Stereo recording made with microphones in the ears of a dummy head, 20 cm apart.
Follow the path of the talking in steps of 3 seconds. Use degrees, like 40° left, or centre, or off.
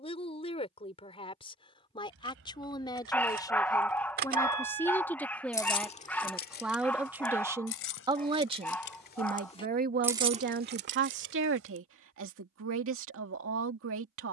30° left, 10° left, 10° right, 50° right, 70° right.